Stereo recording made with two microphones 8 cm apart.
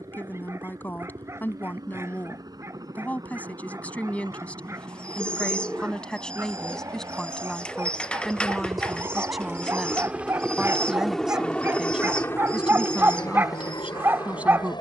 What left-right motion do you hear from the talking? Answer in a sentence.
You can hear the talking go from the left side to the right.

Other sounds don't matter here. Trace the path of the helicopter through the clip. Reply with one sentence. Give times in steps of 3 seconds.
In this clip you hear the helicopter on the right from 0 s, in the centre from 9 s and on the left from 12 s.